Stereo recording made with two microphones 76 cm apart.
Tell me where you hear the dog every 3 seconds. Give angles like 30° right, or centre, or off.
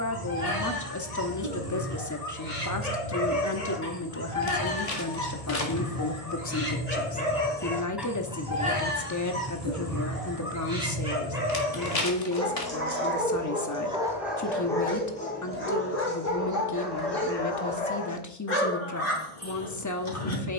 60° left, 40° left, 10° left, 30° right, 10° right, 20° left, 50° left.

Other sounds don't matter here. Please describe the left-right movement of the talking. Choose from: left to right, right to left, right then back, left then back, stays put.
stays put.